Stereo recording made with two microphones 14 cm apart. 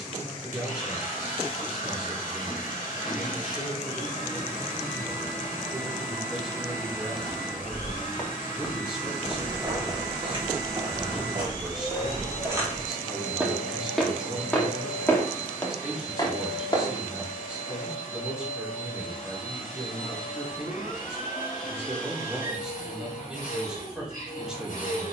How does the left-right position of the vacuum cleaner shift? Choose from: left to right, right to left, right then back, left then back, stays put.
stays put.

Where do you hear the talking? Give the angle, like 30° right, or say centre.
centre.